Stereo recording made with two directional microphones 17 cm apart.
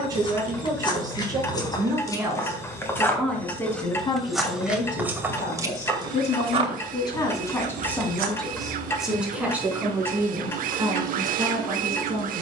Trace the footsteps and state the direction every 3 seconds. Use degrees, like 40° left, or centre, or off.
20° left, 10° right, 50° right, off.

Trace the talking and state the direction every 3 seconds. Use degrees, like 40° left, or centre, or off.
20° right, 30° left, 20° left, 20° right.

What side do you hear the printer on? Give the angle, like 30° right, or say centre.
60° right.